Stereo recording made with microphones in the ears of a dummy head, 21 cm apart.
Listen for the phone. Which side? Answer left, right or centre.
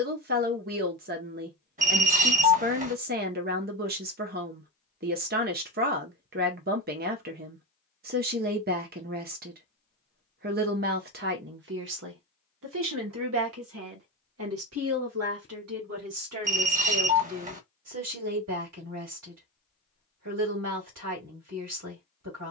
right.